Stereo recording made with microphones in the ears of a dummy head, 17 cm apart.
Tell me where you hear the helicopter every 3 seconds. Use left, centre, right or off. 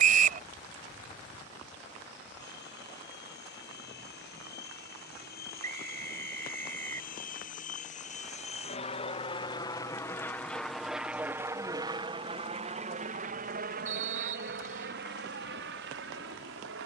left, left, left, centre, right, right.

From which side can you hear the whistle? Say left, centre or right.
right.